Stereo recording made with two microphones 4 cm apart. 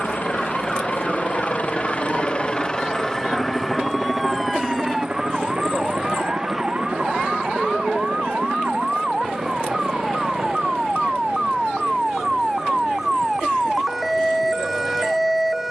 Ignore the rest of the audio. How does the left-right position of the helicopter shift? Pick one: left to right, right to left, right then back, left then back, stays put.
left to right.